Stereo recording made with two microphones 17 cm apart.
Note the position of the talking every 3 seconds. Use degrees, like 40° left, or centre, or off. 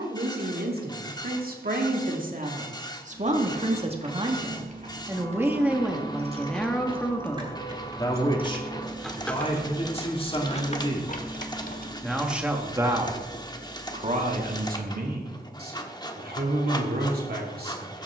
60° right, 30° right, 10° left, 30° left, 30° right, 70° right.